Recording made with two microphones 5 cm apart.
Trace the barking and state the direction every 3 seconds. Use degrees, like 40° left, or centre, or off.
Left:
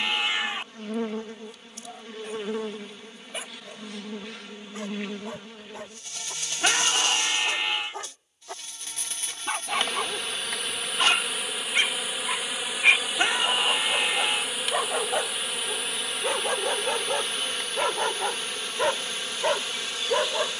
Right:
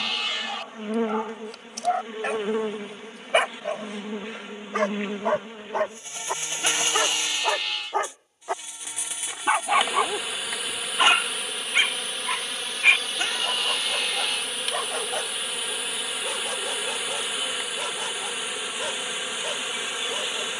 70° right, 60° right, 50° right, 30° right, centre, 20° left, 40° left.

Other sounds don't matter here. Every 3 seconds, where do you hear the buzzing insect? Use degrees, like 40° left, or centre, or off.
20° right, 20° right, 20° right, centre, 10° left, centre, 10° right.